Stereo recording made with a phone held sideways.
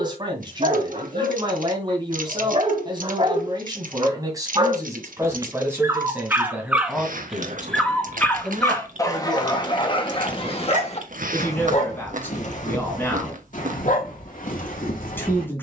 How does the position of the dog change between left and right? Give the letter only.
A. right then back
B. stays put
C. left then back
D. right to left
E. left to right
D.